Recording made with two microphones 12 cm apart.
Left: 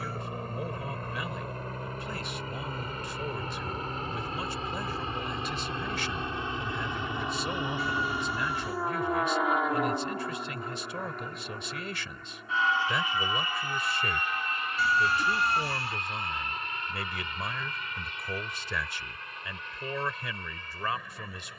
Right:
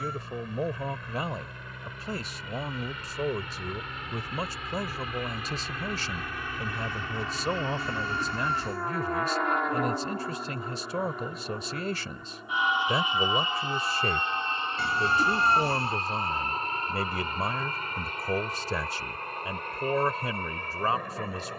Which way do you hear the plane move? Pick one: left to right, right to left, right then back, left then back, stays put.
left to right.